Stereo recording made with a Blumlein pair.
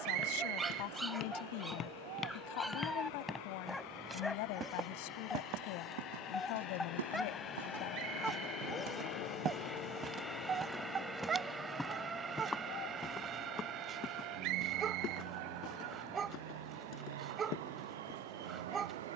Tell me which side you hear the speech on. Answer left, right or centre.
left.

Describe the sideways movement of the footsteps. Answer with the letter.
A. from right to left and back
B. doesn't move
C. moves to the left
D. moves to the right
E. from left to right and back
E.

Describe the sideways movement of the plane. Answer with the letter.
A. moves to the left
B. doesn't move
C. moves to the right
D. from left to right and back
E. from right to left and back
C.